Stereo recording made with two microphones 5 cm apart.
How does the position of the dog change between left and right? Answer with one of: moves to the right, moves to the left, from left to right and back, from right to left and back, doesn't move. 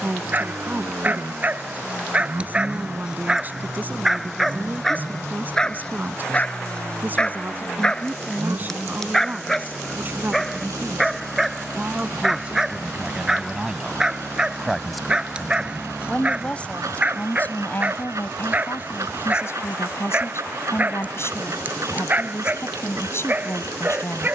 from right to left and back.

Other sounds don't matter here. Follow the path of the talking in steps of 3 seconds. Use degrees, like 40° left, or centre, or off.
30° right, 30° right, 30° right, 30° right, 20° right, 20° left, 50° left, 50° left.